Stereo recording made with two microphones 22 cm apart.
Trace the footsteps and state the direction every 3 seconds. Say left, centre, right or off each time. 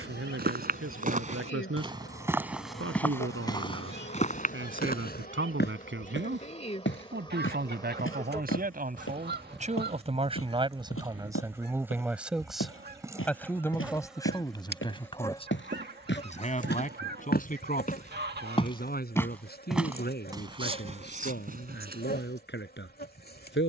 right, left, left, left, left, left, centre, right.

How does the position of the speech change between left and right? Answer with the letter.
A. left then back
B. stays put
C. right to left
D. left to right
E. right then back
C.